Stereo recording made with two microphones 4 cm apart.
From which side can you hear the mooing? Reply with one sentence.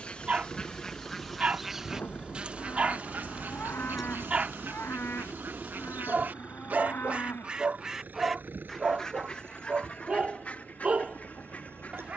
You can hear the mooing on the left.